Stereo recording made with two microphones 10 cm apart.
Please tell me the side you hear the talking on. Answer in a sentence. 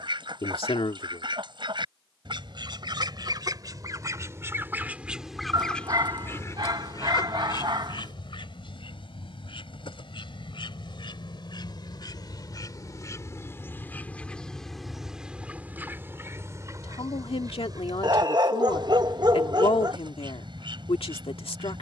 You can hear the talking on the left.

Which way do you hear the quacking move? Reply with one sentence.
In this clip you hear the quacking go left and come back.